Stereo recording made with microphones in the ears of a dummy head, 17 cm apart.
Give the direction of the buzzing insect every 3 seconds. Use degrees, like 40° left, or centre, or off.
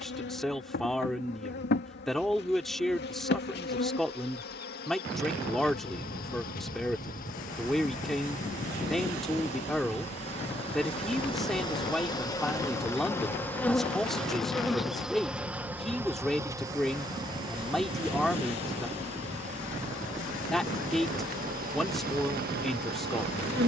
60° left, 50° left, 50° left, 30° left, 10° left, 20° right, 40° right, 50° right.